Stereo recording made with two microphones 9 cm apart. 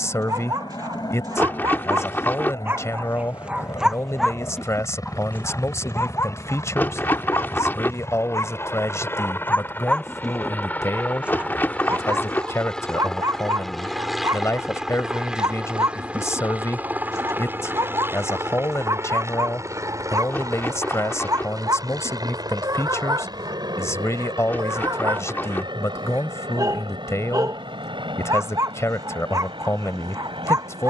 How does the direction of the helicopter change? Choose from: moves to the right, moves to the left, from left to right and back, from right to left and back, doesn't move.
moves to the right.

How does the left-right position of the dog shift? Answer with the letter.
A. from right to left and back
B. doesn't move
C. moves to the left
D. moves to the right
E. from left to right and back
A.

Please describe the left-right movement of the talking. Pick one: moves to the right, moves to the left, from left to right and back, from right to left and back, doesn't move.
doesn't move.